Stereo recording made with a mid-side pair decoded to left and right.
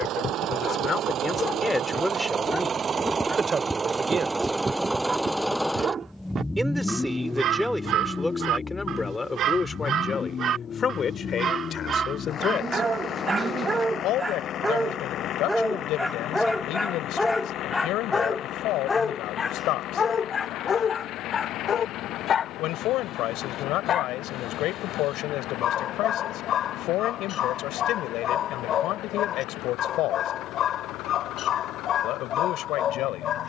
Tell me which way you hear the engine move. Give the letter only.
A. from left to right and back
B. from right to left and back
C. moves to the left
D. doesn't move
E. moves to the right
C.